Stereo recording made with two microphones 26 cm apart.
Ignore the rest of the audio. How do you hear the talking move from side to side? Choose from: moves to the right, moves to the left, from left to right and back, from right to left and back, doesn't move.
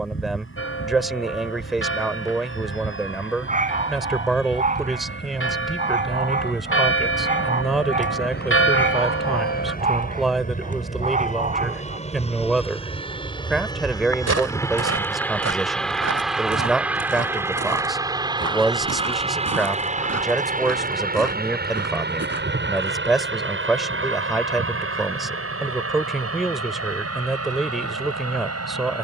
doesn't move.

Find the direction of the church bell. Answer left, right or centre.
left.